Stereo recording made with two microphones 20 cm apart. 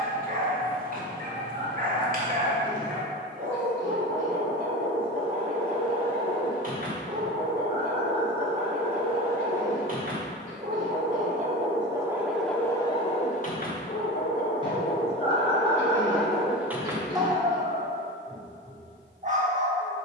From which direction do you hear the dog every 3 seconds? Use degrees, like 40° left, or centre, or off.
40° right, 40° right, 40° right, 40° right, 30° left, centre, 40° right.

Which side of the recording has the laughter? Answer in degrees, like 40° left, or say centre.
20° right.